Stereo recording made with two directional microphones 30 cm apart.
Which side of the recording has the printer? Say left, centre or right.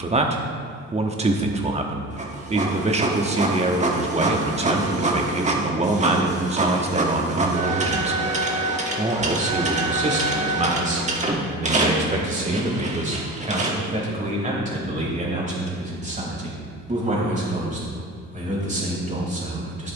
right.